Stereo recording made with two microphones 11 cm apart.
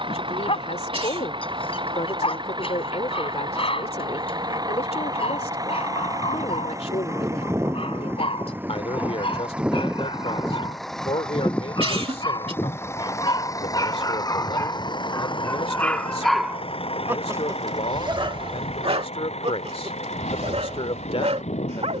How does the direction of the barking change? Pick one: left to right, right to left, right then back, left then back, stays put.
left to right.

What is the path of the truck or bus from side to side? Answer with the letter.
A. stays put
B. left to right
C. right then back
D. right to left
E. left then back
D.